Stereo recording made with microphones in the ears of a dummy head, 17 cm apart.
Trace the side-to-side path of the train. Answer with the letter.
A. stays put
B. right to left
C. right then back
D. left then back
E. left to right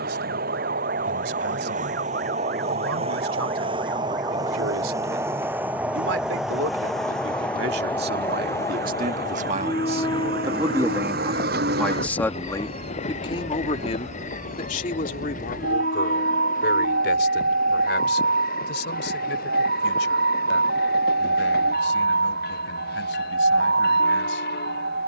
B.